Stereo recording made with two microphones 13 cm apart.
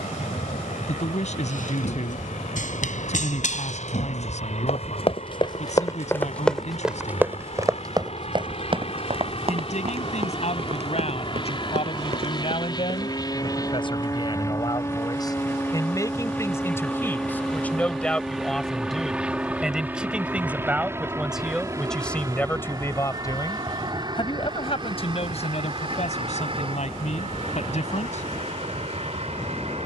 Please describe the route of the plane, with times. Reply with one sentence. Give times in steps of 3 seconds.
In this clip you hear the plane on the left from 0 s, in the centre from 15 s and on the right from 21 s.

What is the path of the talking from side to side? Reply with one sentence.
In this clip you hear the talking go right and come back.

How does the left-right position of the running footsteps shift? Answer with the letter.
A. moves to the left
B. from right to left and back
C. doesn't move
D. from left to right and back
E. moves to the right
E.